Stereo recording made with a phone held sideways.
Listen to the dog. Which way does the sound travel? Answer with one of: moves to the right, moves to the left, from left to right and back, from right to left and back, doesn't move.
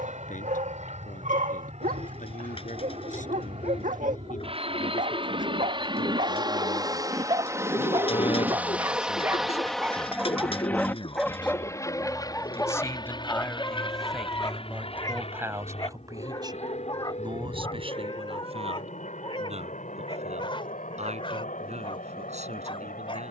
moves to the left.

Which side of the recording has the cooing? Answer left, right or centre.
left.